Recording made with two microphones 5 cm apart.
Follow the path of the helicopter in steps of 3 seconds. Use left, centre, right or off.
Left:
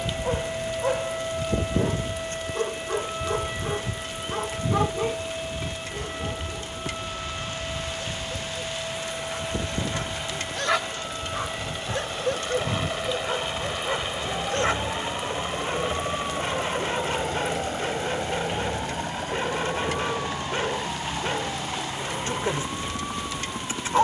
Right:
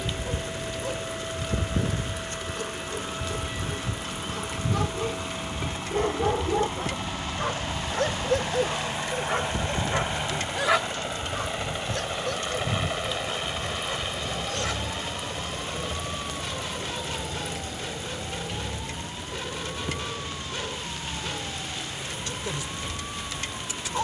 right, right, right, right, centre, left, left, left.